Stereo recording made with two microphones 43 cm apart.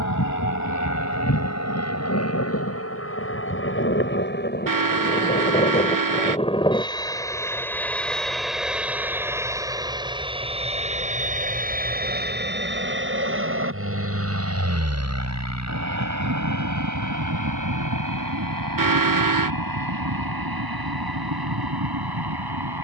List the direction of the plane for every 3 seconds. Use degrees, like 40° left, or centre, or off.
40° left, 20° left, 10° left, 10° right, 30° right, 40° right, 50° right, 50° right.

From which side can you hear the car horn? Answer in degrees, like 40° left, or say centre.
50° right.